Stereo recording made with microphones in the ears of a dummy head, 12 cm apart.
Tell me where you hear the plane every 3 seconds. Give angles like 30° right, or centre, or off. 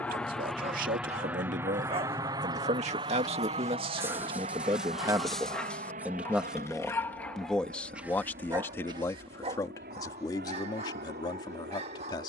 10° right, 50° right, 60° right, 70° right.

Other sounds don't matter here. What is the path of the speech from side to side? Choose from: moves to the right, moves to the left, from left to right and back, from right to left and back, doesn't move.
moves to the left.